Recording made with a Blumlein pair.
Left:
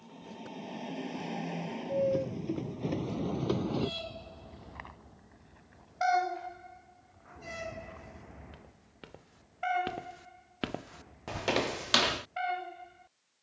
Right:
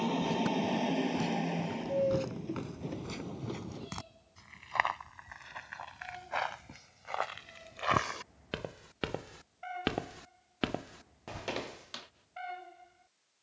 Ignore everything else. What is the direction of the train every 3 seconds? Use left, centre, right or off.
centre, left, left, left, left.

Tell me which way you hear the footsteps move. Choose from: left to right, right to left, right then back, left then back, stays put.
right to left.